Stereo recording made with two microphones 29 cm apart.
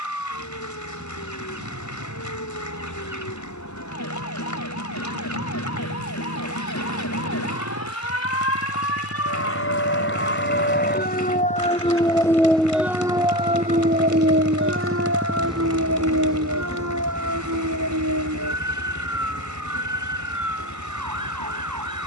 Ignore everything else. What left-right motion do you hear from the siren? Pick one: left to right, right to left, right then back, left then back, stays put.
left to right.